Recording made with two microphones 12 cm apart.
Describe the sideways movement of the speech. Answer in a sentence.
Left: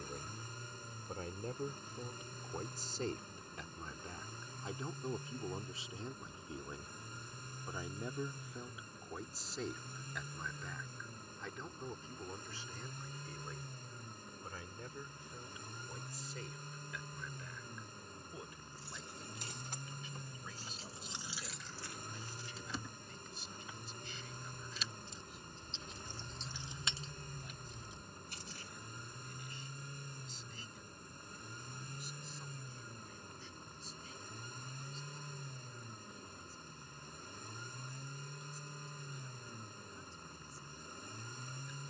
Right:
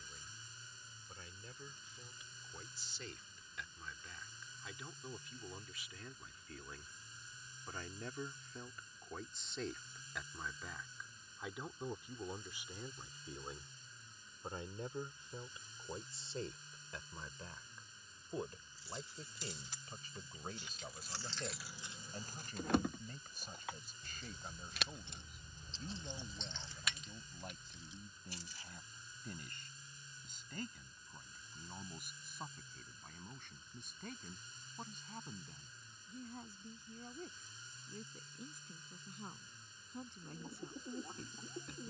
In this clip you hear the speech move to the right.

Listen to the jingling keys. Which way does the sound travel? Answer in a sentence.
In this clip you hear the jingling keys move from left to right and back again.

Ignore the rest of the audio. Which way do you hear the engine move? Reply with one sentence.
In this clip you hear the engine stay put.